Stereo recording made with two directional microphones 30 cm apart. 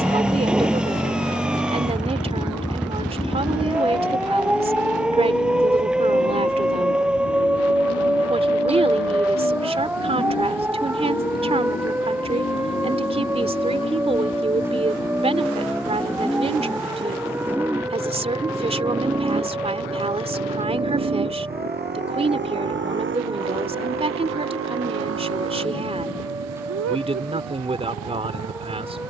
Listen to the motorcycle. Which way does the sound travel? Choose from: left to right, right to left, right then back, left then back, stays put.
left to right.